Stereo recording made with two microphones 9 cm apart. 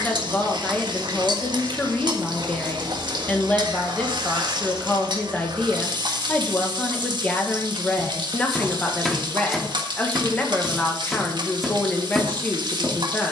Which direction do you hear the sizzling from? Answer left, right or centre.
right.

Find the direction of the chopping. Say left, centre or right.
centre.